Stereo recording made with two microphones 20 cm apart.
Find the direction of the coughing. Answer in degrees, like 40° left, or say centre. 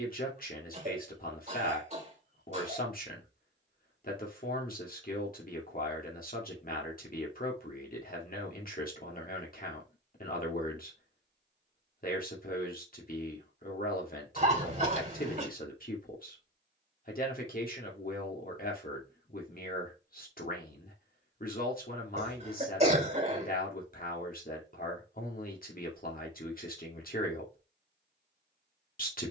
30° right.